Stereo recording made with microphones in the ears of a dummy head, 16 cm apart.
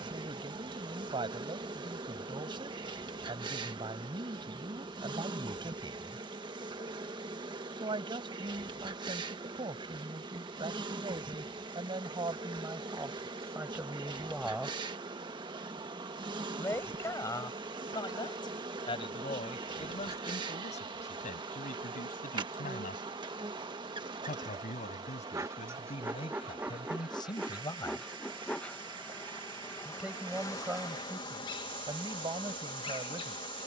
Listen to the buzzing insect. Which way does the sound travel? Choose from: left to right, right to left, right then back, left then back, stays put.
right to left.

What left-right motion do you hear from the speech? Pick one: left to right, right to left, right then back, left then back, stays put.
left then back.